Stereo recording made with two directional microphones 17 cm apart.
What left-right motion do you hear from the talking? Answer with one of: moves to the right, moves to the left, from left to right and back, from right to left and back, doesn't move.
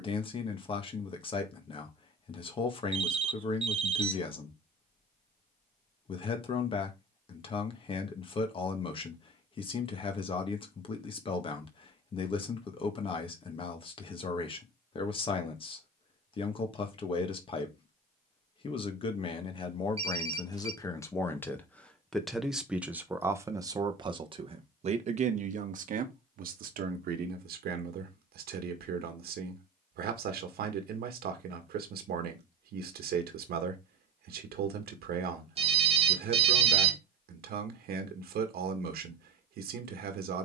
moves to the right.